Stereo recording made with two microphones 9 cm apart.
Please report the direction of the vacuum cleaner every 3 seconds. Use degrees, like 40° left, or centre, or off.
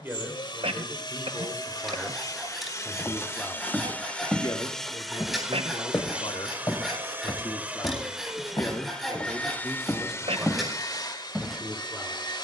50° left, 10° left, 10° right, 40° left.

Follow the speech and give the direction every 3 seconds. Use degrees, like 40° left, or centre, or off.
10° right, 50° left, 40° left, centre.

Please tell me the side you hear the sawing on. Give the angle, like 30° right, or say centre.
centre.